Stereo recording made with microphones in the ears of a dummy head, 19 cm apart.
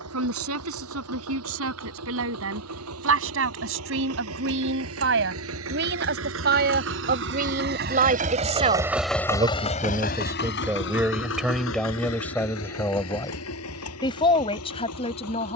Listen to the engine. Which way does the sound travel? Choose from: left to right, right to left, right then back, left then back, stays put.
right to left.